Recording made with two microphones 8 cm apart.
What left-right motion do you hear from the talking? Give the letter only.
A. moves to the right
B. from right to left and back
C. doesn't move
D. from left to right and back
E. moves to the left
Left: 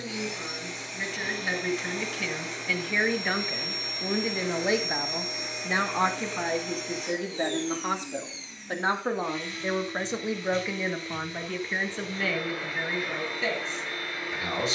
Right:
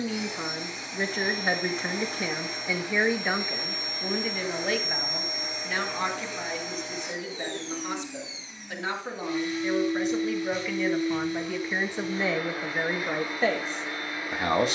B.